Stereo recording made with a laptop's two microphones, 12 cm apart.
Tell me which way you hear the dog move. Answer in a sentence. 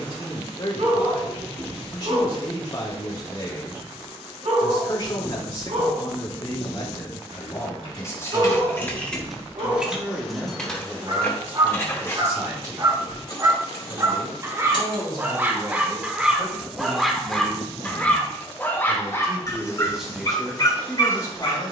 In this clip you hear the dog travel towards the left.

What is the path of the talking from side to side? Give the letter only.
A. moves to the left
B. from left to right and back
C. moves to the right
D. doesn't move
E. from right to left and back
B.